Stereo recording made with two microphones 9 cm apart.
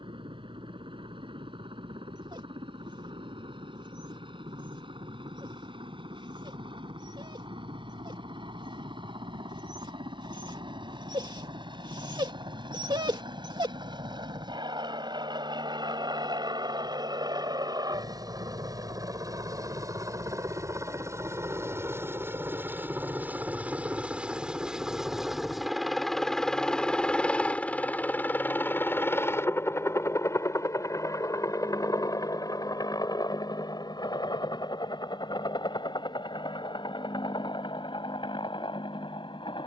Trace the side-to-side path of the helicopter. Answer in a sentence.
In this clip you hear the helicopter go from the right side to the left.